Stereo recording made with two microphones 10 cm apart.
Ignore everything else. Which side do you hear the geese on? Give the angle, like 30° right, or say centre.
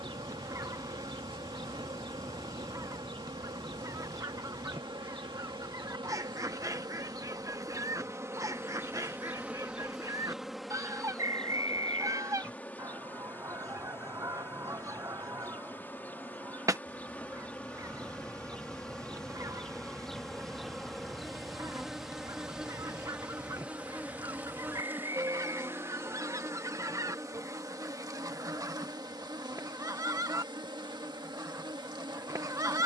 30° right.